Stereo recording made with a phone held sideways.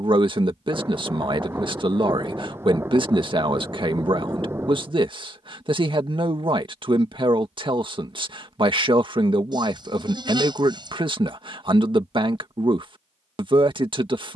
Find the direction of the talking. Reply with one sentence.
You can hear the talking on the right.